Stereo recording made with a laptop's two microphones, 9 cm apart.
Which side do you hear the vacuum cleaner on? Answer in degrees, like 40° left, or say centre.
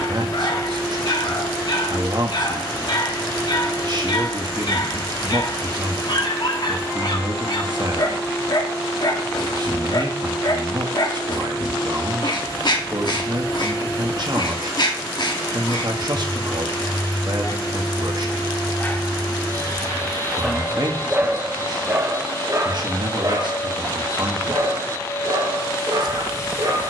40° left.